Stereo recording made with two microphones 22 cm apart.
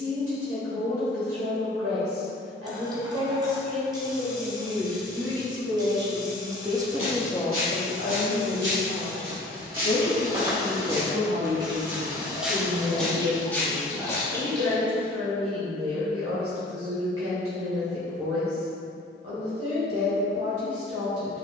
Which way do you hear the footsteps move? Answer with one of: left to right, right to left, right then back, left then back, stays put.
right to left.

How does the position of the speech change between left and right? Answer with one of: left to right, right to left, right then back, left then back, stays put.
left then back.